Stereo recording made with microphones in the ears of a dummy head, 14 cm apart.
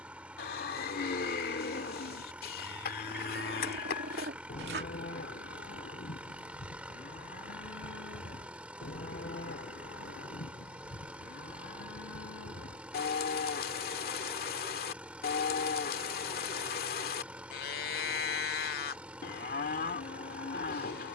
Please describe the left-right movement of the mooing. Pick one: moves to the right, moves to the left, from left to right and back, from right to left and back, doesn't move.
doesn't move.